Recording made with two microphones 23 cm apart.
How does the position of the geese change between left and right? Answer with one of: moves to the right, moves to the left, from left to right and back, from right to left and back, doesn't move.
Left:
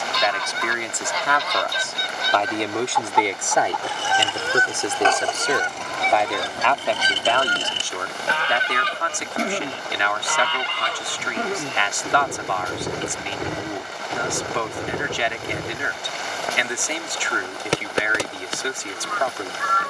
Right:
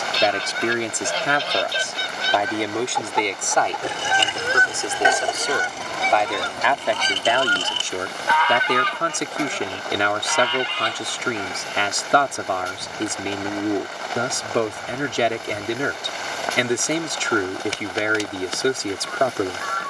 moves to the left.